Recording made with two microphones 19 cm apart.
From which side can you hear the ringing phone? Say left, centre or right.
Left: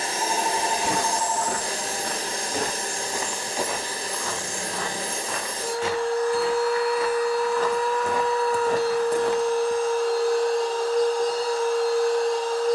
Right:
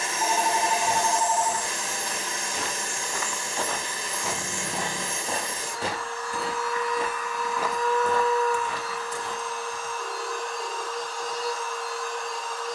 right.